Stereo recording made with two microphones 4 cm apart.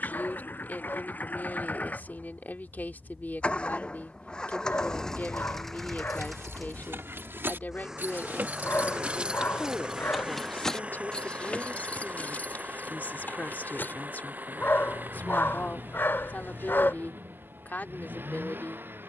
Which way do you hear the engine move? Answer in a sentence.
You can hear the engine travel towards the right.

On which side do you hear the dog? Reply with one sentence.
In this clip you hear the dog on the left.